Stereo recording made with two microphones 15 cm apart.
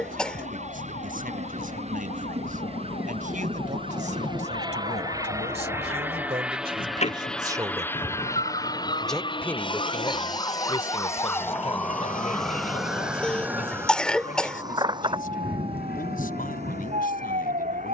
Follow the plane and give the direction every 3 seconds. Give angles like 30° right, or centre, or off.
50° right, 30° right, 10° left, 40° left, 60° left, 70° left.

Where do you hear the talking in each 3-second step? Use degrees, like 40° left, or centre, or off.
70° right, 50° right, 30° right, 30° left, 60° left, 70° left.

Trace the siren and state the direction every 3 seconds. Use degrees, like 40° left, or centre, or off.
60° left, 60° left, 50° left, 20° left, 10° right, 40° right.